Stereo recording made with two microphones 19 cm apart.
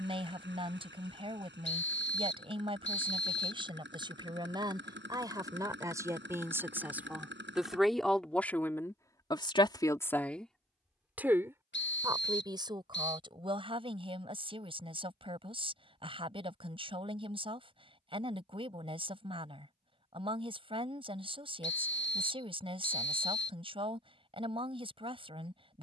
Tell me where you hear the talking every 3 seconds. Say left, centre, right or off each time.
right, right, centre, centre, right, right, right, right, right.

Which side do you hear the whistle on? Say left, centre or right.
left.